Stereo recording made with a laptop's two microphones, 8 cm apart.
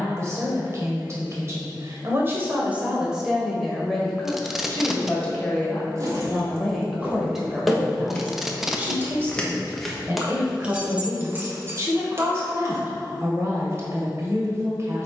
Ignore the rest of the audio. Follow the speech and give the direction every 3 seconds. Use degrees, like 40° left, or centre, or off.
30° right, 10° left, 10° right, 30° right, 40° right.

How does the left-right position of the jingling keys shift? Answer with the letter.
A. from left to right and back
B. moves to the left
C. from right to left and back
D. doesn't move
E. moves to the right
C.